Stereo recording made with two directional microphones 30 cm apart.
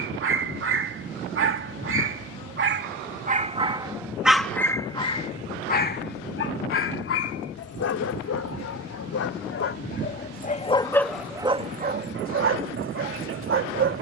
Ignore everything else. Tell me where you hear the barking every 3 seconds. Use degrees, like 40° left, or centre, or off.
40° right, 10° left, 50° left, 20° left, 40° right.